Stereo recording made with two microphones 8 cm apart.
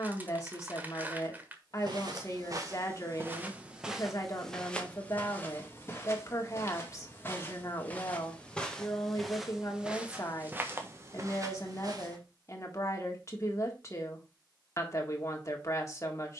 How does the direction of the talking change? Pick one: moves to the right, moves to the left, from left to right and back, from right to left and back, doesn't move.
doesn't move.